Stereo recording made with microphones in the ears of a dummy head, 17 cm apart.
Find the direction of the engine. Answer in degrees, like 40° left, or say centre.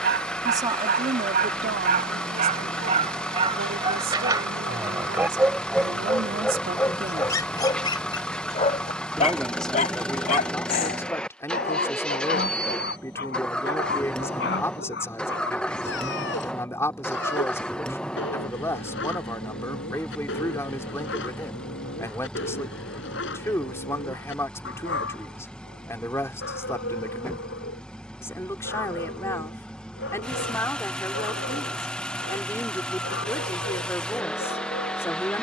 10° left.